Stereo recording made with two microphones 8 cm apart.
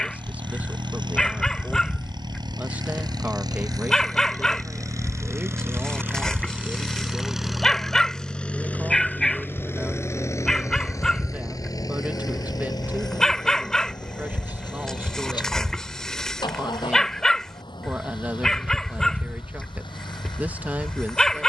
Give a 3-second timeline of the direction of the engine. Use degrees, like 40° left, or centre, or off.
70° right, 40° right, centre, 30° left, 50° left, 60° left, 70° left.